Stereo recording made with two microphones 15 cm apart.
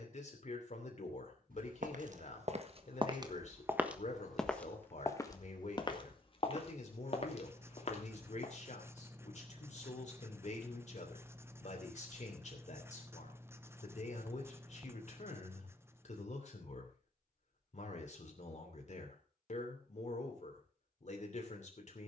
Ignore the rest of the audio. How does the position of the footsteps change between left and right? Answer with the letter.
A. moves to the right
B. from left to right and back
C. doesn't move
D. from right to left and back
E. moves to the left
E.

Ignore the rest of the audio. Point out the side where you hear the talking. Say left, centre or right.
left.